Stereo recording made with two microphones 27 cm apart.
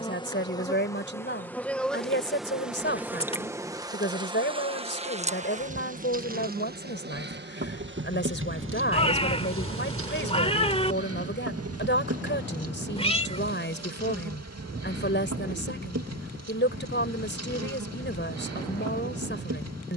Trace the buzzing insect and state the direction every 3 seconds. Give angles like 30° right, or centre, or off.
10° left, 20° right, 40° right, 50° right, 60° right, 60° right, 60° right.